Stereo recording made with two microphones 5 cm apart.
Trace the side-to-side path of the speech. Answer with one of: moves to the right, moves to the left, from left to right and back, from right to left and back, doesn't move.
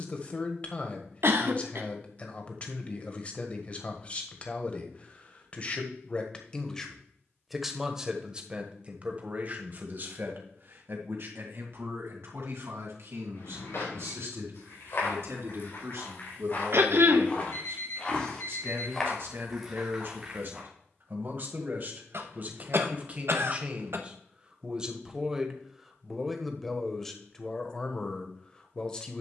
from left to right and back.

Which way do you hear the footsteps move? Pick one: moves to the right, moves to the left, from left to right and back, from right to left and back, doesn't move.
moves to the right.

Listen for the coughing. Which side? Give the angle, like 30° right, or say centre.
60° right.